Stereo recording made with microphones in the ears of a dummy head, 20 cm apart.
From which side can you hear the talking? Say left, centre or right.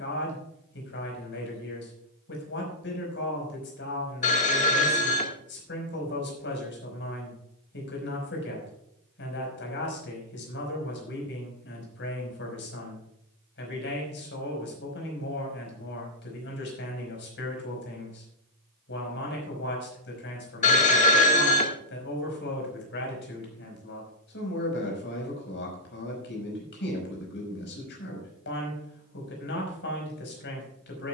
left.